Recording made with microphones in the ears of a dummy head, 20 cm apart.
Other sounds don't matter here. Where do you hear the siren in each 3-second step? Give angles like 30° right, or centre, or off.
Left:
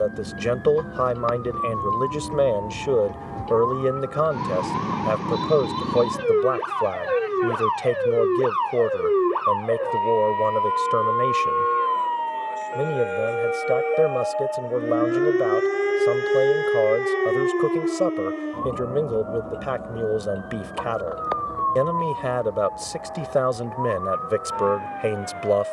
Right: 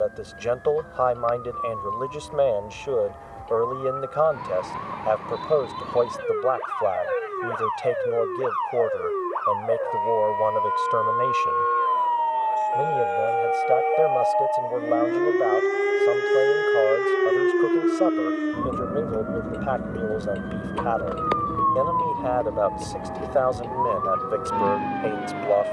70° left, 70° left, 60° left, 50° left, 30° left, centre, 30° right, 40° right, 50° right.